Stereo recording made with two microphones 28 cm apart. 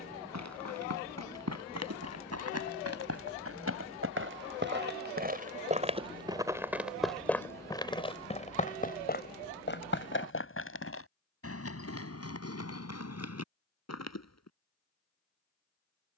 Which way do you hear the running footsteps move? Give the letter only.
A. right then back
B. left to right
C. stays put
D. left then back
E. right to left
E.